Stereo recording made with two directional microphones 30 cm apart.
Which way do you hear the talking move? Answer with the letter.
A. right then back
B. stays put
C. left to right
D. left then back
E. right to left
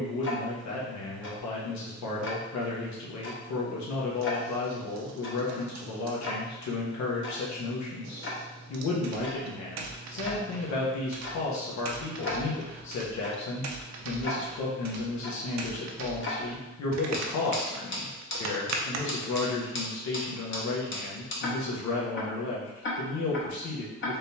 B.